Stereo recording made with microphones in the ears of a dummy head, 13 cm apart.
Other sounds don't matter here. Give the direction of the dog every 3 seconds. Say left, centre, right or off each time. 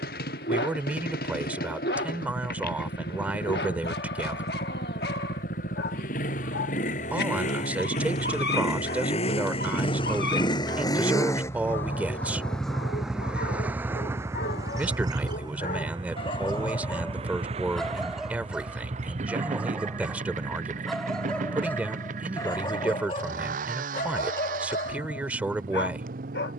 left, left, left, left, left, left, centre, left, left.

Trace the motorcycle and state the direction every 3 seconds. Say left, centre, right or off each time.
left, left, left, left, centre, right, right, right, right.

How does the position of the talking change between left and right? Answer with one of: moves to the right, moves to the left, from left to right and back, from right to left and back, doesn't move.
doesn't move.